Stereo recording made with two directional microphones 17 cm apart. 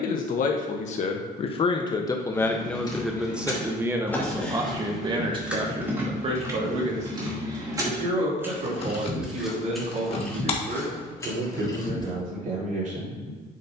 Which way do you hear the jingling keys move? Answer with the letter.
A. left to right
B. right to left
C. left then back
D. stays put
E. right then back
E.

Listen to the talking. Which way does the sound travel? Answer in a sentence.
You can hear the talking go from the left side to the right.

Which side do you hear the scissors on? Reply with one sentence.
In this clip you hear the scissors on the left.